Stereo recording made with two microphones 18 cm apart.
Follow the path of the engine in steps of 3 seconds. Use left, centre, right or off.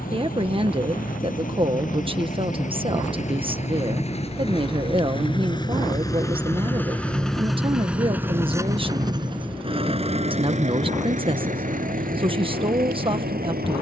left, left, centre, right, right.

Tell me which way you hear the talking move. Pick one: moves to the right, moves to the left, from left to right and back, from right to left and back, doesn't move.
doesn't move.